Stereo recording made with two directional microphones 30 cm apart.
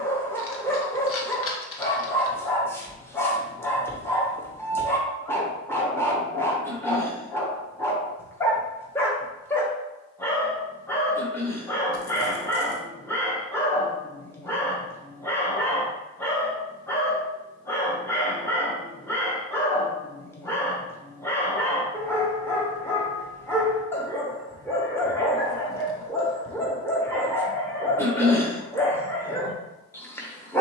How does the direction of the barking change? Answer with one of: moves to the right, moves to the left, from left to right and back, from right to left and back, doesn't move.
doesn't move.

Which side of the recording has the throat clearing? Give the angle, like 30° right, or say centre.
10° left.